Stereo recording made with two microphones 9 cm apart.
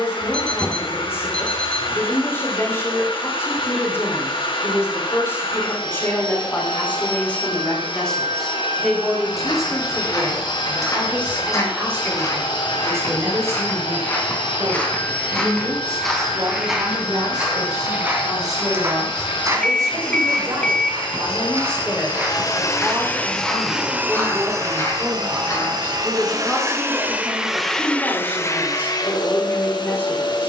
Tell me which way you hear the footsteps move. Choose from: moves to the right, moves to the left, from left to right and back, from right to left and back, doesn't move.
from left to right and back.